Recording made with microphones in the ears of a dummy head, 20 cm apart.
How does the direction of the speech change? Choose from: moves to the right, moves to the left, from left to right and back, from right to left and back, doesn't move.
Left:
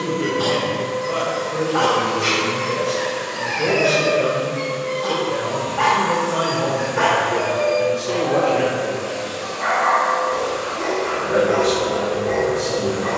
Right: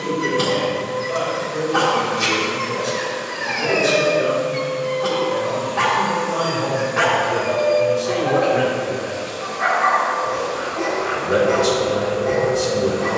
moves to the right.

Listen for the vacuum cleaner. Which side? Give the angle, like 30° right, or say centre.
50° left.